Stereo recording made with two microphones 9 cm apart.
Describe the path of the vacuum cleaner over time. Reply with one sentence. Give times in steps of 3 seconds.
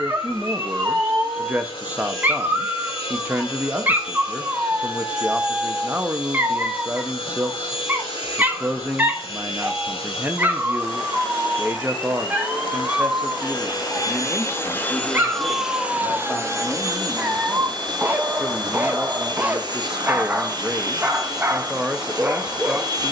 In this clip you hear the vacuum cleaner on the left from 0 s and on the right from 15 s.